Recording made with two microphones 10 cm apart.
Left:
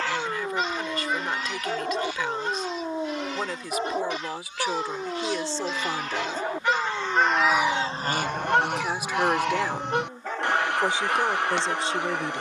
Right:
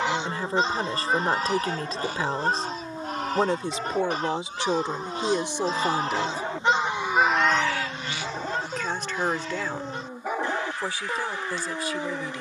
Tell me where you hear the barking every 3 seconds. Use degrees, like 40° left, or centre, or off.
30° left, 20° left, centre, 10° right.